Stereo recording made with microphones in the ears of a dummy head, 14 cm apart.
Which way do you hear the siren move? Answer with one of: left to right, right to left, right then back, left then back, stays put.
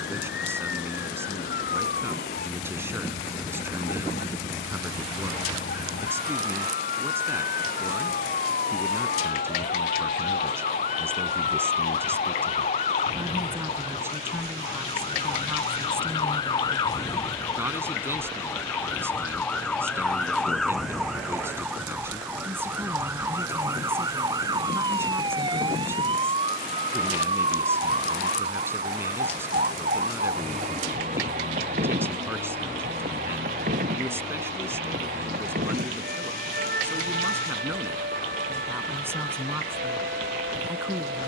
left to right.